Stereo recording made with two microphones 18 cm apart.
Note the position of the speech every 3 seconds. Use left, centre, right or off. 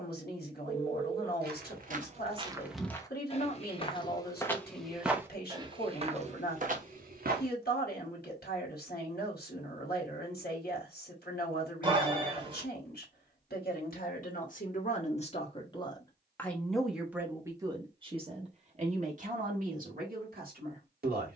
left, left, left, left, left, centre, right.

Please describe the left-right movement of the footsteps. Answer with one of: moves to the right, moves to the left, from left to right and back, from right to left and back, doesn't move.
from right to left and back.